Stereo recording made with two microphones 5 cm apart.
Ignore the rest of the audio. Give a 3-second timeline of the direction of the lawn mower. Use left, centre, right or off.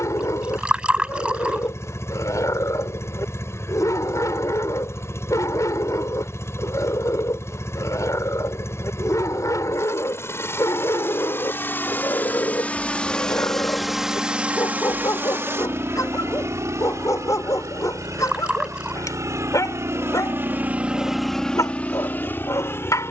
left, left, left, left, centre, right, right, left.